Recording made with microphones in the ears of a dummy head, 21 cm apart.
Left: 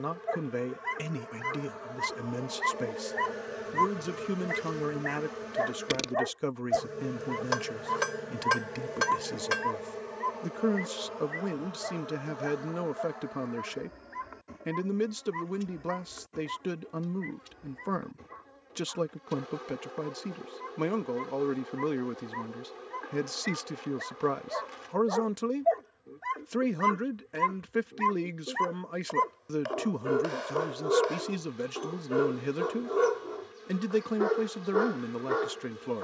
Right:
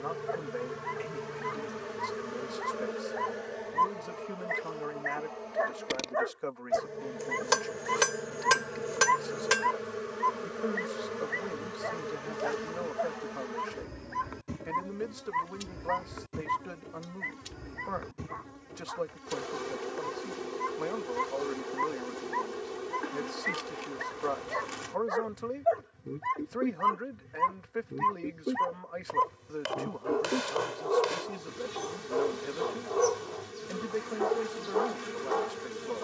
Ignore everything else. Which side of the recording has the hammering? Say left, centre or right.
right.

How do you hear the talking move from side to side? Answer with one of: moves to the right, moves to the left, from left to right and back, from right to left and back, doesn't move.
doesn't move.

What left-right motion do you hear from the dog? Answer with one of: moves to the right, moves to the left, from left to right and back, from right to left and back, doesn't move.
from left to right and back.